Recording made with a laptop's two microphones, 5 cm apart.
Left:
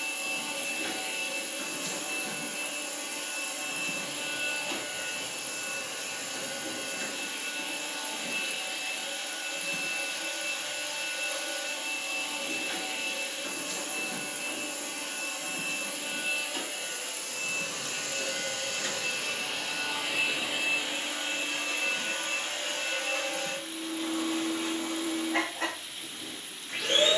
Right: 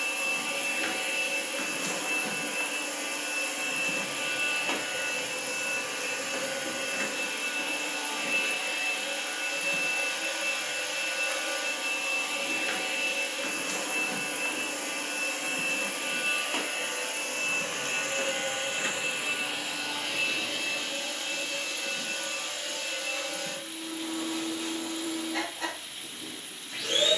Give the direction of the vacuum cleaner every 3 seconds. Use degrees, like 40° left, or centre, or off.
60° right, 60° right, 60° right, 60° right, 60° right, 50° right, 10° right, 40° left, 40° left.